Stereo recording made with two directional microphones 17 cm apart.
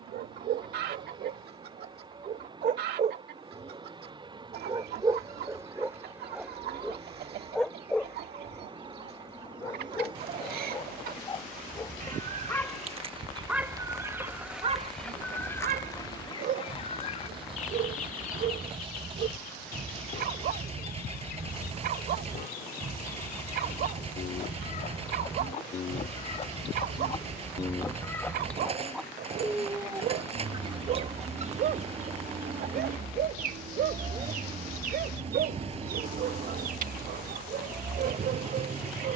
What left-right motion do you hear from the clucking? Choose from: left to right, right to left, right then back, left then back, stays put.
left then back.